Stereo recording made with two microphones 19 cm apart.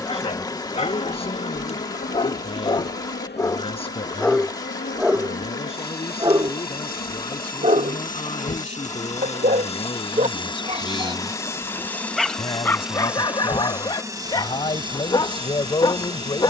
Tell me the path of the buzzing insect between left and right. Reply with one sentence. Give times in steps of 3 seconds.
You can hear the buzzing insect on the left from 0 s, in the centre from 12 s and on the right from 15 s.